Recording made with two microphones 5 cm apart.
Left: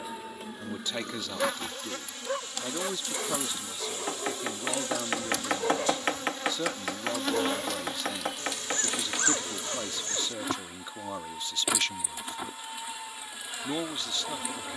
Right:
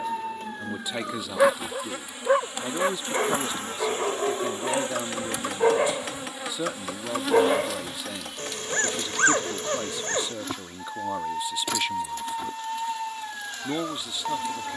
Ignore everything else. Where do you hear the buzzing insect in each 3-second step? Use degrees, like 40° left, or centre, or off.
10° right, 30° right, centre, 10° left, 10° left.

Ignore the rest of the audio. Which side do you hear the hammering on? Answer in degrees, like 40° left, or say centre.
40° left.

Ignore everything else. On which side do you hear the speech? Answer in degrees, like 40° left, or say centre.
10° right.